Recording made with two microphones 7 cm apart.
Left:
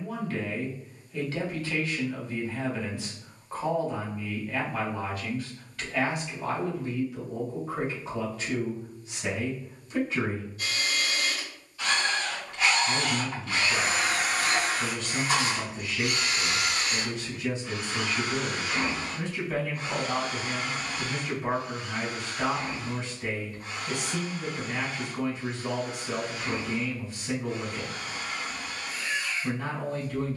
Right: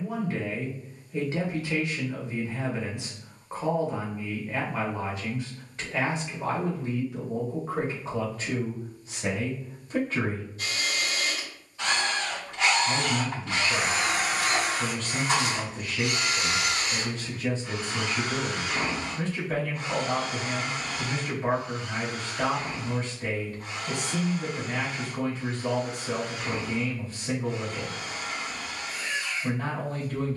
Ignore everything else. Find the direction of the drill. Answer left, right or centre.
right.